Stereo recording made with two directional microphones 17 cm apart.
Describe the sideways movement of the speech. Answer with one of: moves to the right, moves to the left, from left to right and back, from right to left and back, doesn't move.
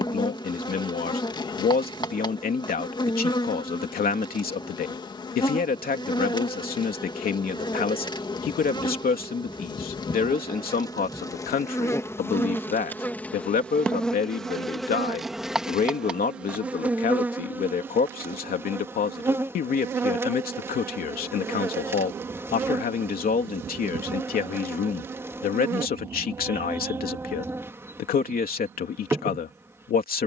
doesn't move.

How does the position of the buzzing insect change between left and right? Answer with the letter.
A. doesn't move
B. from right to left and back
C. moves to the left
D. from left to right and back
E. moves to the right
E.